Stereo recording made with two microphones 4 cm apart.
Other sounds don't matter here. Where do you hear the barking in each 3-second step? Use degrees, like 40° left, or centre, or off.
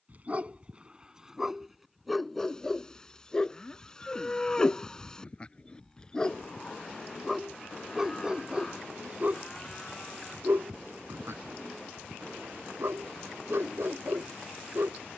10° right, 20° left, 10° right, 60° right, 70° right.